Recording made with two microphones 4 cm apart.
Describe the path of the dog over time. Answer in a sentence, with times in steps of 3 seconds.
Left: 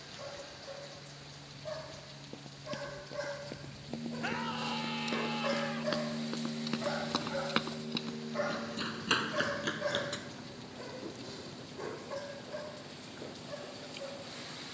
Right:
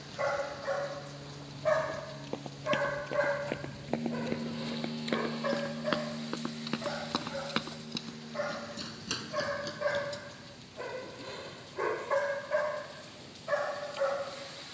In this clip you hear the dog on the right from 0 s, in the centre from 6 s and on the right from 9 s.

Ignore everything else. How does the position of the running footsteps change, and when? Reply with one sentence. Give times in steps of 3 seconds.
In this clip you hear the running footsteps on the right from 0 s, in the centre from 6 s, on the left from 9 s and not at all from 12 s.